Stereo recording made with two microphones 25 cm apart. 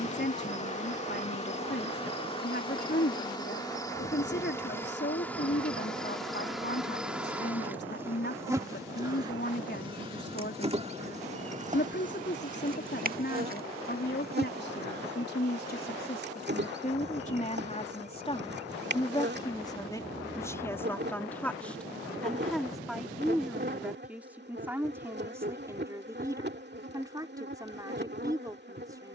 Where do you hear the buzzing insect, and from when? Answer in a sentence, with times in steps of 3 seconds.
In this clip you hear the buzzing insect on the left from 0 s, in the centre from 3 s and on the right from 9 s.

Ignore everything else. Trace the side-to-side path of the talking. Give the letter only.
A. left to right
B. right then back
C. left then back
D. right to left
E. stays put
A.